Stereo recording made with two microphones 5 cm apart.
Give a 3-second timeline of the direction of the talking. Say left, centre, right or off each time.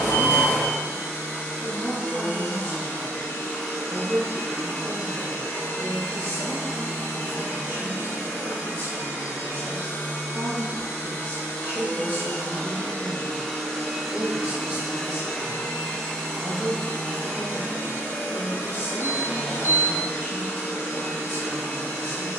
right, right, right, right, right, centre, right, right.